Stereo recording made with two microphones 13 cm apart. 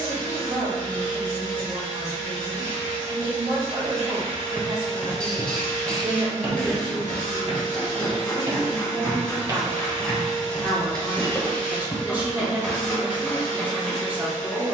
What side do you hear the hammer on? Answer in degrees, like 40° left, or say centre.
10° left.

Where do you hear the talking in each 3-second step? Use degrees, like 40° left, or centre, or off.
50° right, 50° right, 30° right, 20° right, 10° right.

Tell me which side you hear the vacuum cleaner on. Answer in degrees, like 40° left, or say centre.
80° right.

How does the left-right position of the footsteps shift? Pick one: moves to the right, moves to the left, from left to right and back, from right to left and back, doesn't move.
from left to right and back.